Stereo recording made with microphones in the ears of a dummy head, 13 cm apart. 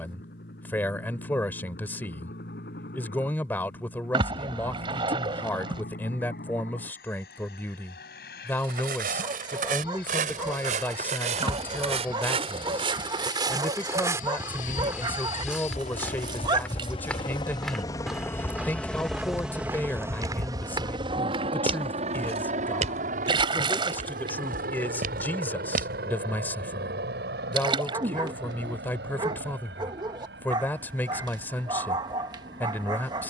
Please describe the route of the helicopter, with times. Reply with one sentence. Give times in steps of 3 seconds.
You can hear the helicopter on the left from 0 s, in the centre from 18 s and on the right from 21 s.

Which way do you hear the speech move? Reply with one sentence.
You can hear the speech stay put.